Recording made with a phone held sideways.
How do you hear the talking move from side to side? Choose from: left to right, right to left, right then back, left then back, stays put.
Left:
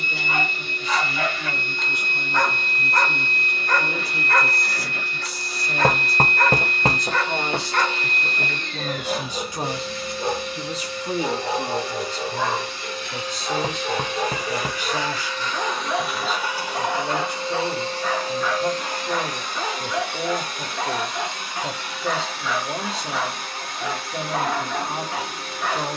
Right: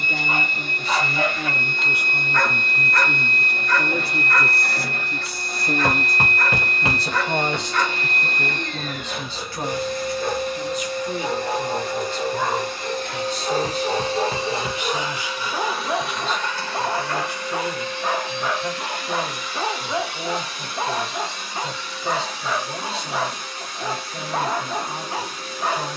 right to left.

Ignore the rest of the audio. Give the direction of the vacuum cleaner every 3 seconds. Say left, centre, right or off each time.
right, right, right, right, right, centre, left, left, left.